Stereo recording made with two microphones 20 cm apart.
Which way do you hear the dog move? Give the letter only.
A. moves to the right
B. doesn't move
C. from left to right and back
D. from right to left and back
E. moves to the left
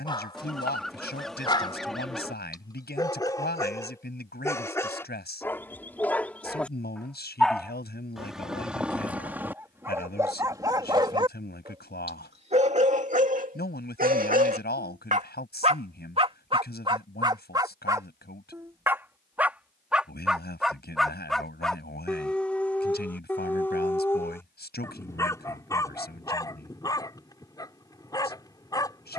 C.